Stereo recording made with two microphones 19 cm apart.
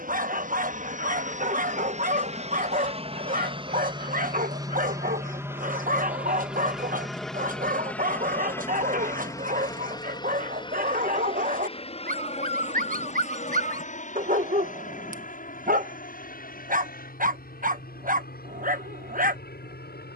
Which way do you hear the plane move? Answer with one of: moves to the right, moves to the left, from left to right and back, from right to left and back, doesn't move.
moves to the left.